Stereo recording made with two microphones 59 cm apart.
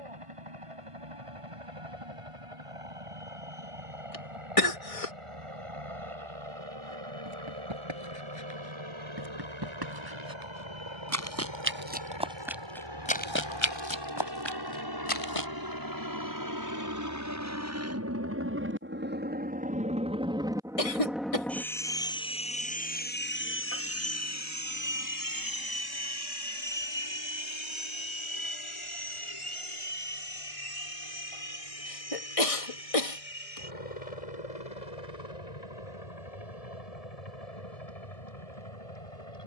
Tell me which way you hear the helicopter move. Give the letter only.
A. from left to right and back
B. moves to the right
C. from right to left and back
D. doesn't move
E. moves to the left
E.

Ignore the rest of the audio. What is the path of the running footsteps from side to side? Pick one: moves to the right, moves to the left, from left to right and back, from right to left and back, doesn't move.
moves to the left.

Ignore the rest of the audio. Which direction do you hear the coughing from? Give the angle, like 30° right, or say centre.
70° left.